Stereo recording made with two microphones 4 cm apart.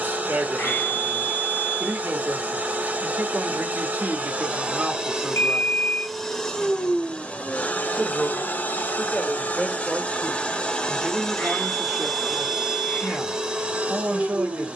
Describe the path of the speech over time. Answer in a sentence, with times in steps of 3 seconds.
You can hear the speech on the right from 0 s, in the centre from 6 s and on the right from 12 s.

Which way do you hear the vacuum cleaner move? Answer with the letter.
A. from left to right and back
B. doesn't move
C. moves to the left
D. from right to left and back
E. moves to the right
D.